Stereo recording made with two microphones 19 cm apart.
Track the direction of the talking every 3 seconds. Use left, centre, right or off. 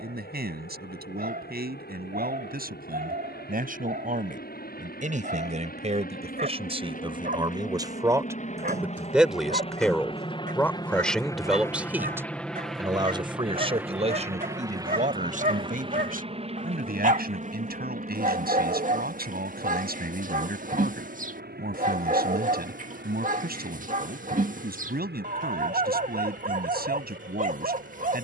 right, right, right, centre, right, right, right, right, right, right.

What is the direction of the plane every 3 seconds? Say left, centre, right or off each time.
left, left, left, left, centre, right, right, right, right, right.